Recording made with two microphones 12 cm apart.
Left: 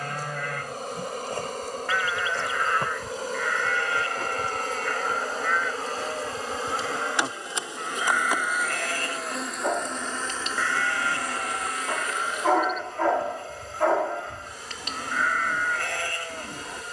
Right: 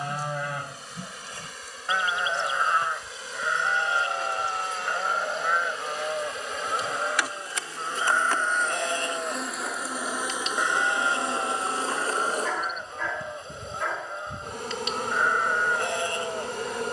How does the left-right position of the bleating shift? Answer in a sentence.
You can hear the bleating stay in one place.